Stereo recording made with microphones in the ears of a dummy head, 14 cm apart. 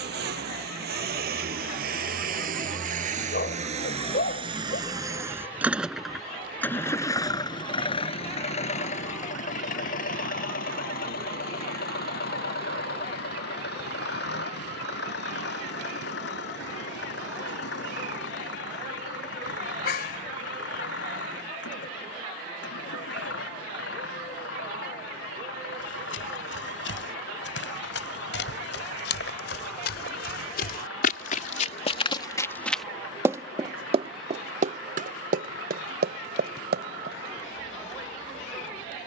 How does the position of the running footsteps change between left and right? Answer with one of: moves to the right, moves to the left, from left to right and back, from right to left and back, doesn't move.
moves to the right.